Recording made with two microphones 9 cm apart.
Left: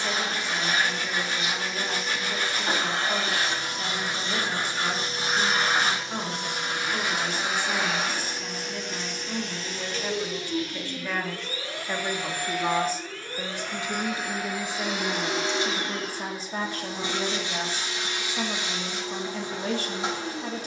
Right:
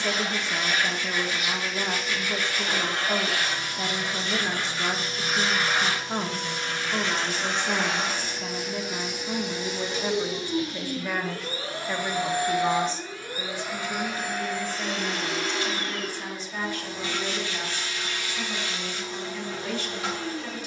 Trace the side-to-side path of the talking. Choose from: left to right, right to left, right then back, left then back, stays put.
right to left.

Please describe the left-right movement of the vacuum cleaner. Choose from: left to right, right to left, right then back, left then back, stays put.
right then back.